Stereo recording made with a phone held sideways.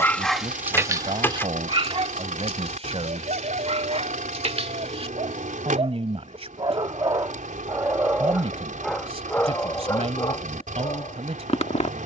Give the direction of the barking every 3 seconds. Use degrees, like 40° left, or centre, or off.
30° right, 50° right, 20° right, 30° left.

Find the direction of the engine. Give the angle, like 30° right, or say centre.
80° right.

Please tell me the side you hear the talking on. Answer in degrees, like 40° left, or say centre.
50° right.